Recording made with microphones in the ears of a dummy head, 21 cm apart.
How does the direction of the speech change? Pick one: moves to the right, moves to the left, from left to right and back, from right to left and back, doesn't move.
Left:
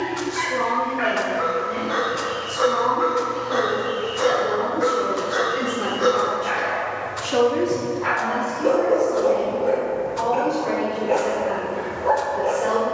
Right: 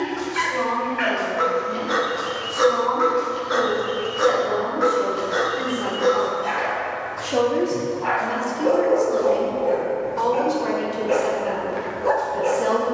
moves to the right.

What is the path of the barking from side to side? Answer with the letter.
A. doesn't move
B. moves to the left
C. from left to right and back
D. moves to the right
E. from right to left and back
E.